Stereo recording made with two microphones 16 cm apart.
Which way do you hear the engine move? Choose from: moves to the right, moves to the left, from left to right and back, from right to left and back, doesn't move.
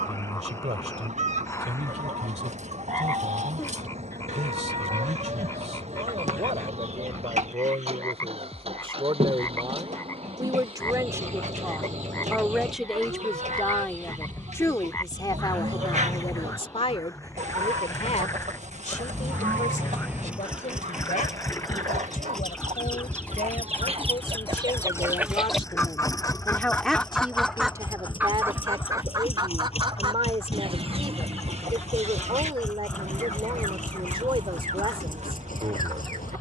moves to the left.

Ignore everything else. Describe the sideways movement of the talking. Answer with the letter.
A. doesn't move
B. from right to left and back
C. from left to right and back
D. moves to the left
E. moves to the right
B.